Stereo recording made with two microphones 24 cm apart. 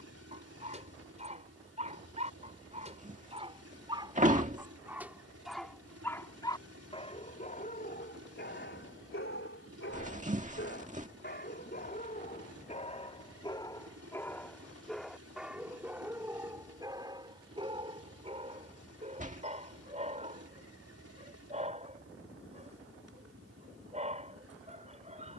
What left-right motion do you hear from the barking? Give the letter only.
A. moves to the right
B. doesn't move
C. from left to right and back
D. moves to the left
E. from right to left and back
E.